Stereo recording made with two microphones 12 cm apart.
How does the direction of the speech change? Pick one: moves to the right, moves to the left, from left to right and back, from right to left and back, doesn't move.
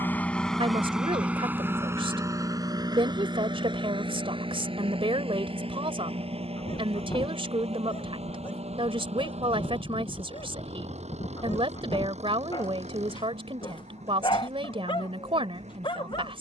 doesn't move.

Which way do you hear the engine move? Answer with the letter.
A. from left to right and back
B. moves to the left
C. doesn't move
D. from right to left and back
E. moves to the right
E.